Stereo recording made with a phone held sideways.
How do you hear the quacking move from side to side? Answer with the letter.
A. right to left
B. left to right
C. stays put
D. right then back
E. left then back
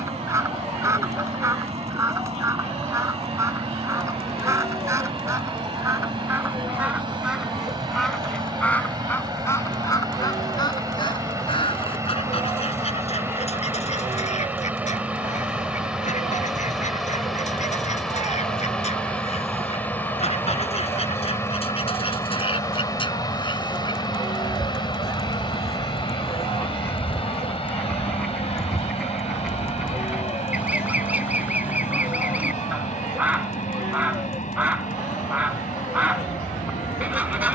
E.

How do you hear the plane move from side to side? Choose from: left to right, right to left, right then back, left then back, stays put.
right to left.